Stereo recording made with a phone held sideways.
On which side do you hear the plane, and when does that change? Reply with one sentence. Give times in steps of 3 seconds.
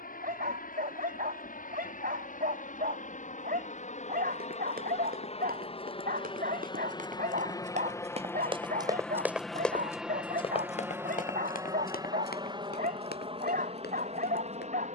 You can hear the plane on the left from 0 s, in the centre from 9 s and on the right from 12 s.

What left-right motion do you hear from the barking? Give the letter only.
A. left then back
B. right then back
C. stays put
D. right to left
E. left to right
C.